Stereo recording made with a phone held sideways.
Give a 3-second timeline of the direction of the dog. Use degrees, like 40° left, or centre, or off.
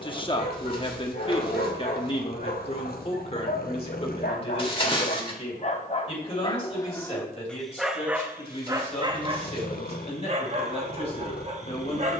70° left, 60° left, 10° left, 40° right.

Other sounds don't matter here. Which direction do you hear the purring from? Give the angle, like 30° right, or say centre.
70° left.